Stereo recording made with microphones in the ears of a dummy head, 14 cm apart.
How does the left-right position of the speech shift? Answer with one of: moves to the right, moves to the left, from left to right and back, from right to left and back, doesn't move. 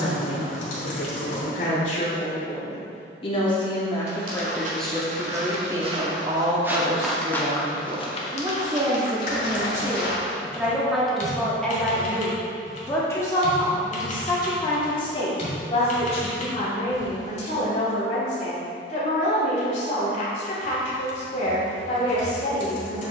from left to right and back.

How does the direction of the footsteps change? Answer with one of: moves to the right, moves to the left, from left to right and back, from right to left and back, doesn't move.
moves to the left.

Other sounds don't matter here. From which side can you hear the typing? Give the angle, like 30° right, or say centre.
50° left.